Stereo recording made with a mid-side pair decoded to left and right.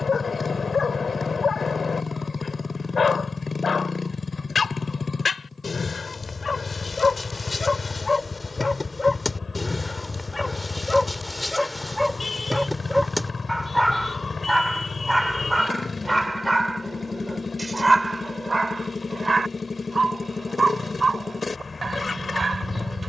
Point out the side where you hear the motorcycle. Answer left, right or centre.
left.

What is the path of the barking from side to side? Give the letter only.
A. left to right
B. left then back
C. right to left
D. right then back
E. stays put
A.